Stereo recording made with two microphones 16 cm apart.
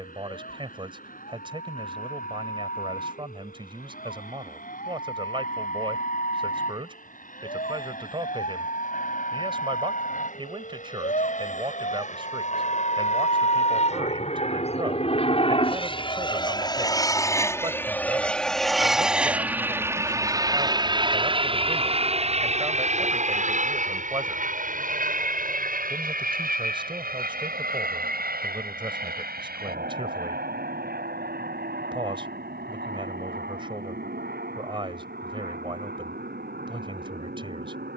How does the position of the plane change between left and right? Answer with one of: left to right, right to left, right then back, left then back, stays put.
left to right.